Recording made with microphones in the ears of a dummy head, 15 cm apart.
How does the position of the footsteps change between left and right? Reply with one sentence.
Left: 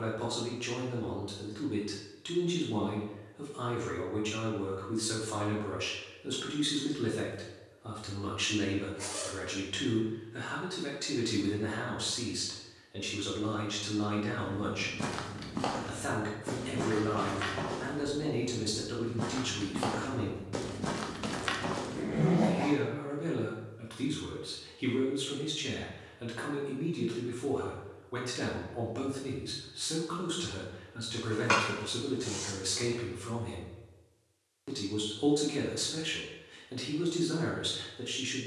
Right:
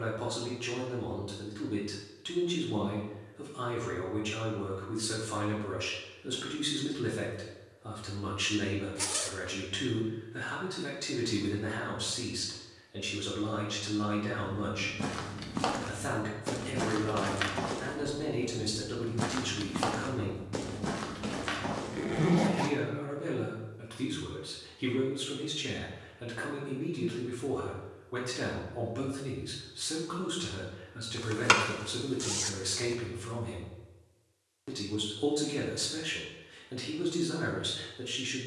In this clip you hear the footsteps go right and come back.